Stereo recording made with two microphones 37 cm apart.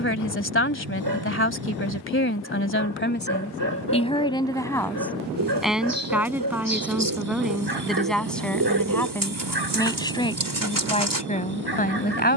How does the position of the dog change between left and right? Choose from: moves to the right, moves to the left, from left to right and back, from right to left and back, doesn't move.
doesn't move.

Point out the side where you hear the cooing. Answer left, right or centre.
right.